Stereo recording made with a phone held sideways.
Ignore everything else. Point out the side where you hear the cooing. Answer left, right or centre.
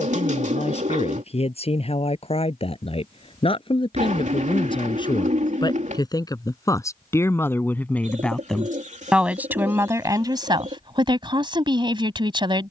right.